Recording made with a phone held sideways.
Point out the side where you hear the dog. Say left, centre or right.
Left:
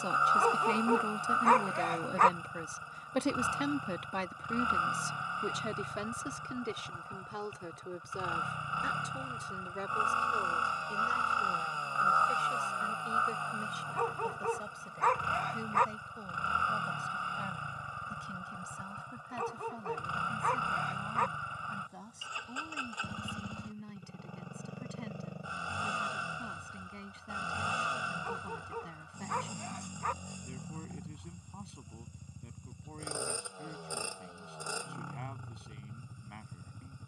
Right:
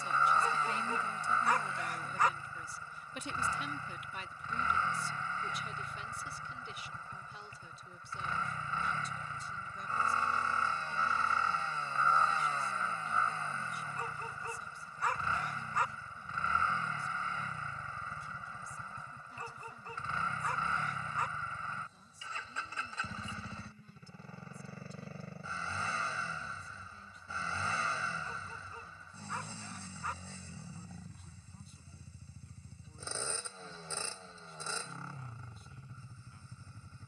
left.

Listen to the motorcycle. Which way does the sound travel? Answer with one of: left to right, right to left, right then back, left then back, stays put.
stays put.